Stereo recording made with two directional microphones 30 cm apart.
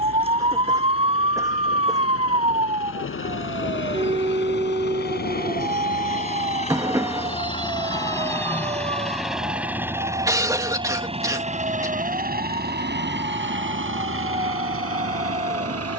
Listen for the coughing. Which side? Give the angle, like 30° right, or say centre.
10° right.